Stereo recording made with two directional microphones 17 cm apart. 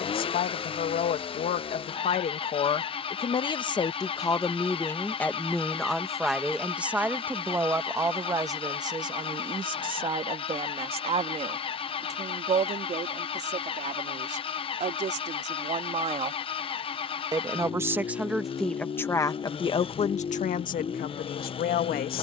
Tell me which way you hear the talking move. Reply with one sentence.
In this clip you hear the talking move from left to right and back again.